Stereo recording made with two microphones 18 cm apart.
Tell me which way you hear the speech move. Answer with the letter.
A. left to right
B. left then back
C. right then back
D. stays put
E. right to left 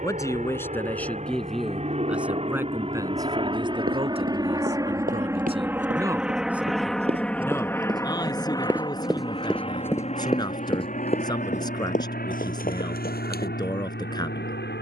C.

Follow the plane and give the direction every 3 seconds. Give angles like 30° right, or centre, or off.
40° right, 20° right, 10° left, 40° left, 60° left.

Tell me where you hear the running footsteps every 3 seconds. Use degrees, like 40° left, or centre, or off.
off, 50° right, 30° right, 20° left, 50° left.